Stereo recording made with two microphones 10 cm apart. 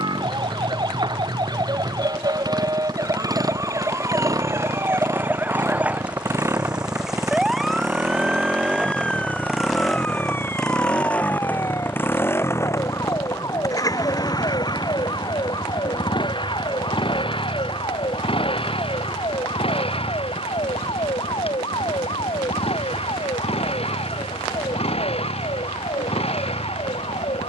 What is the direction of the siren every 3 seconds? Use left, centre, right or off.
right, right, centre, left, left, left, left, left, left.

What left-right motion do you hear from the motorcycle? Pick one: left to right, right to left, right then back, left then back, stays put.
right to left.